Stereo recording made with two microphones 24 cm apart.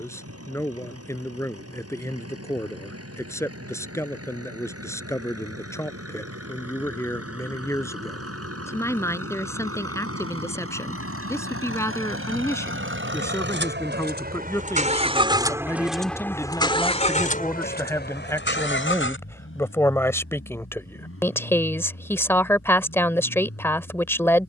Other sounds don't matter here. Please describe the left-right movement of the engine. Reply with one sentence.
You can hear the engine move to the left.